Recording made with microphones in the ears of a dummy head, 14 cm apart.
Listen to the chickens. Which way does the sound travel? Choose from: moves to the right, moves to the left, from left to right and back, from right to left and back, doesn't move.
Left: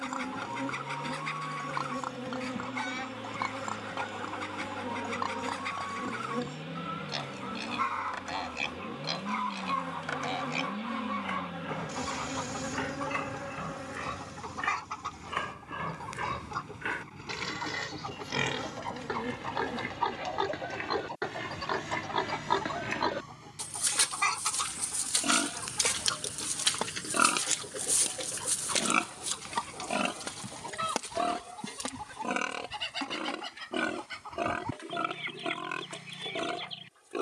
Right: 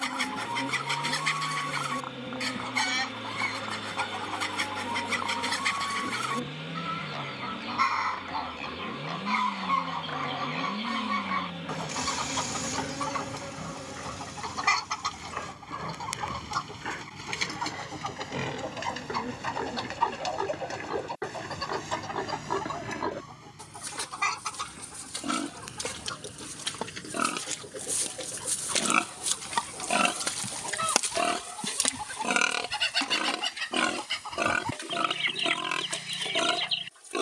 from right to left and back.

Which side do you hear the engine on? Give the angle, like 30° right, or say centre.
30° right.